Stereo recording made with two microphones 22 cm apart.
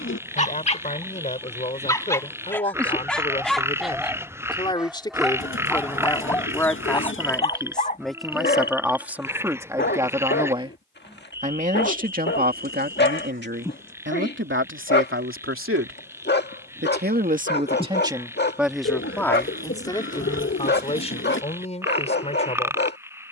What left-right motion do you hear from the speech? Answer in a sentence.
In this clip you hear the speech move from left to right and back again.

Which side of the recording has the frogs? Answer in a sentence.
You can hear the frogs in the centre.